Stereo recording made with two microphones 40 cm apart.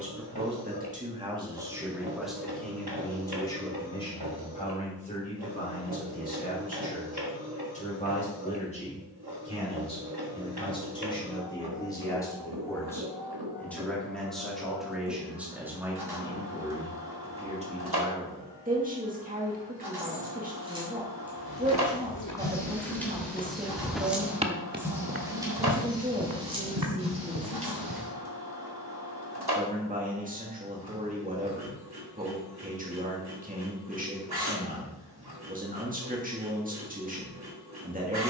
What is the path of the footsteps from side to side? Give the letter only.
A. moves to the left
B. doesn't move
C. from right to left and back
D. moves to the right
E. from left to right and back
D.